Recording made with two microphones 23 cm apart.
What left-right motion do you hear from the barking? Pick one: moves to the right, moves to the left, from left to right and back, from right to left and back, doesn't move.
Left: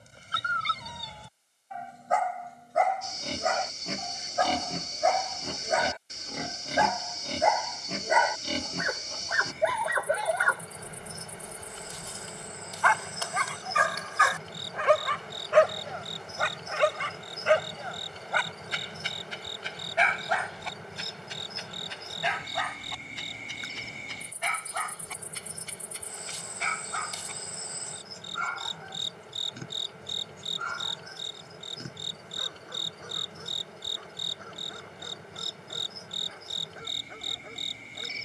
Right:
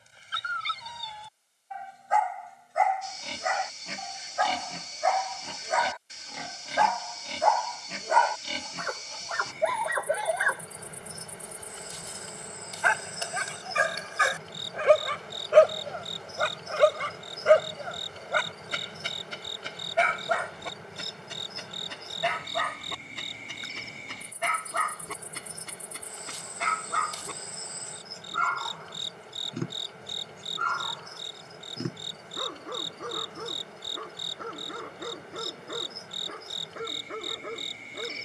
moves to the right.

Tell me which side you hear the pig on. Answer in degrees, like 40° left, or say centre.
50° left.